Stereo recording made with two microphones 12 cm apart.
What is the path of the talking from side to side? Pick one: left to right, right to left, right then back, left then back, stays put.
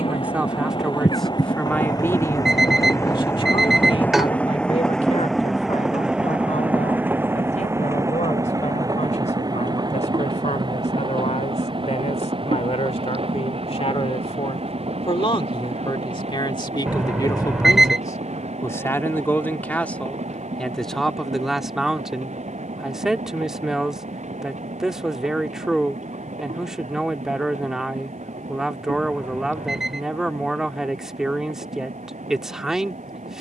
left then back.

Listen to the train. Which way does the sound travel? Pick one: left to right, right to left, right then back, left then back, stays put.
left to right.